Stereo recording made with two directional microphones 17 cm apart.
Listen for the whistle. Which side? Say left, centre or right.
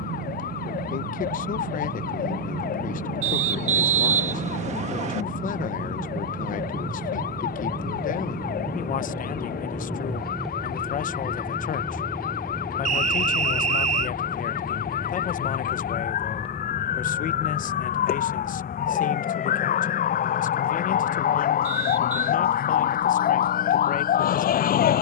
right.